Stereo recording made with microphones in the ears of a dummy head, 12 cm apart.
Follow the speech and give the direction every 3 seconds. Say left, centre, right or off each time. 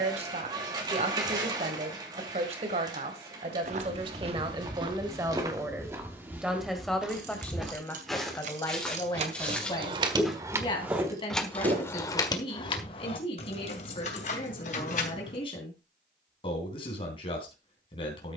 right, right, centre, left, left, left.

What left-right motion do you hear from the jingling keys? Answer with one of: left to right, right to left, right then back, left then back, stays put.
right to left.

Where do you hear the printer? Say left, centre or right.
right.